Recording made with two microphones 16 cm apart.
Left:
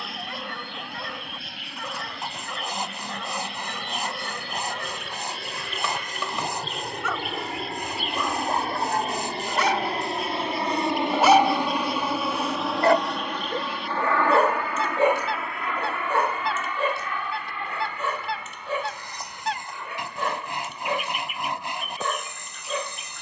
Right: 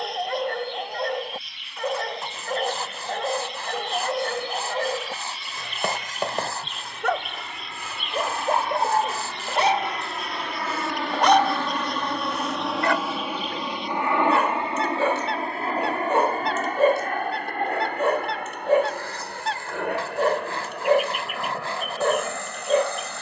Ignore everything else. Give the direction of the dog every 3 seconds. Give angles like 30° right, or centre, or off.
60° right, 60° right, 50° right, 10° right, 40° left, 30° right, 50° right, 50° right.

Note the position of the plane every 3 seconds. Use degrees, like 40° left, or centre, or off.
70° left, 60° left, 50° left, 30° left, 10° right, 40° right, 60° right, 60° right.